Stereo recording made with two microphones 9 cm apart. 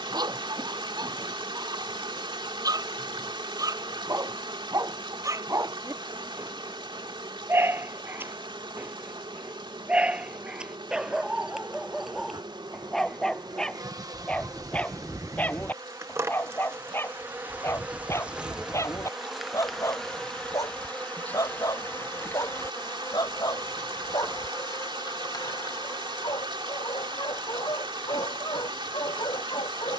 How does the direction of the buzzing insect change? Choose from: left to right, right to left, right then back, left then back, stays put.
right to left.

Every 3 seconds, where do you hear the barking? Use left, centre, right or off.
right, right, right, centre, centre, left, left, left, left, left.